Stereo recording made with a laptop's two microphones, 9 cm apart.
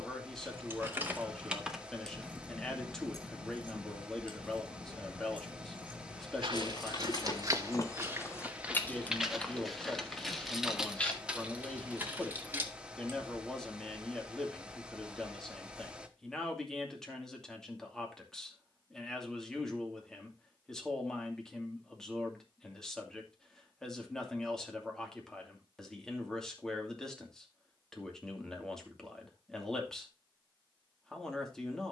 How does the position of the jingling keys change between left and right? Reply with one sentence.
You can hear the jingling keys go left and come back.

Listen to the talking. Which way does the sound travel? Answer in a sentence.
In this clip you hear the talking stay put.